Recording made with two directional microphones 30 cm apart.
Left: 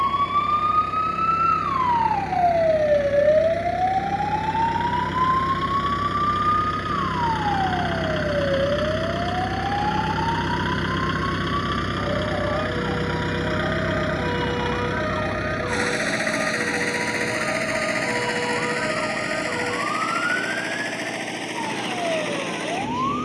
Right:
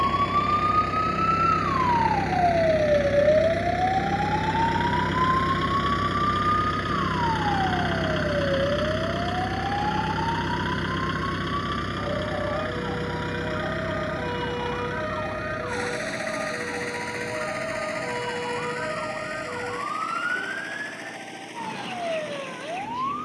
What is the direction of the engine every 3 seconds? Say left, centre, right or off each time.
right, right, centre, centre, left, left, left, left.